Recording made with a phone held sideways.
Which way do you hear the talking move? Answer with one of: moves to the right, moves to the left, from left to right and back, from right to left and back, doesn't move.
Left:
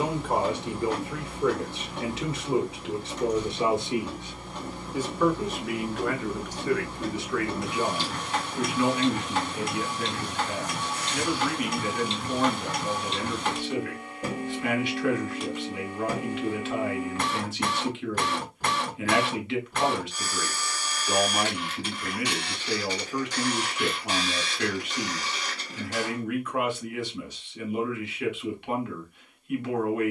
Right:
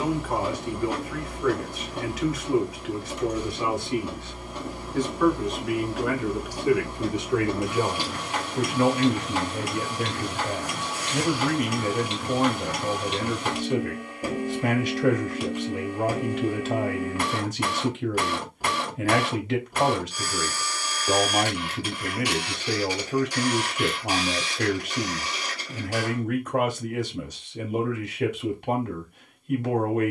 moves to the right.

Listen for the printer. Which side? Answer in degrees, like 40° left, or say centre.
10° right.